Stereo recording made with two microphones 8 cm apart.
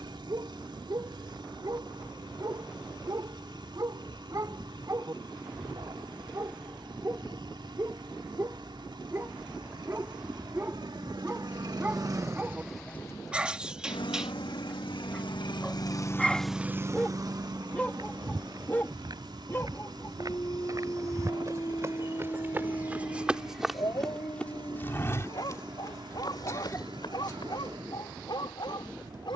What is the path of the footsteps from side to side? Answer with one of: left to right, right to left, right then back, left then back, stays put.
right to left.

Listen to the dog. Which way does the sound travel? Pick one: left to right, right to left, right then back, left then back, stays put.
right to left.